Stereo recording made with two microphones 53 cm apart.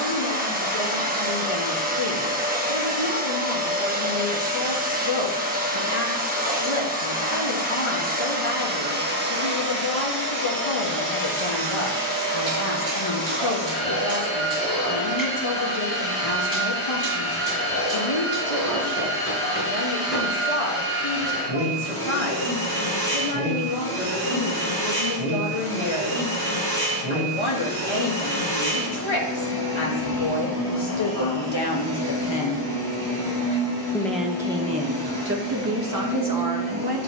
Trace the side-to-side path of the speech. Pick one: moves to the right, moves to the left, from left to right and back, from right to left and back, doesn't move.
moves to the right.